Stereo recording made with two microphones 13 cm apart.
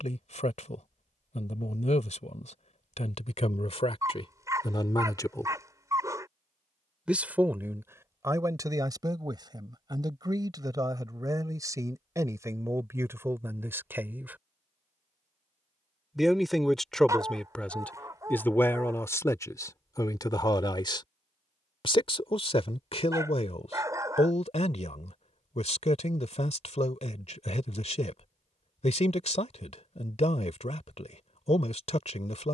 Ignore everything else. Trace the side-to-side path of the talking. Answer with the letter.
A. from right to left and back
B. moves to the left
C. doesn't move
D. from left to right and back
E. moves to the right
D.